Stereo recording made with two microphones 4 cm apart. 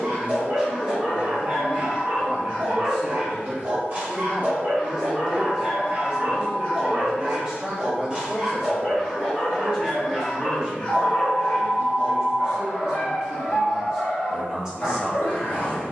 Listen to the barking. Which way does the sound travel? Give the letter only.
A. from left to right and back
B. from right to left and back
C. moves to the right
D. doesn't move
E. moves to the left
E.